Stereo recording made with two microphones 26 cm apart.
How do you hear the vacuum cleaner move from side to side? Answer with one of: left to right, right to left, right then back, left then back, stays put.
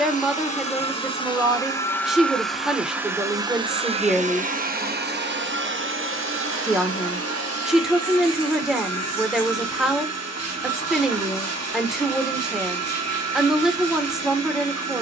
left to right.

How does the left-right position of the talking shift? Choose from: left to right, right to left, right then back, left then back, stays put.
stays put.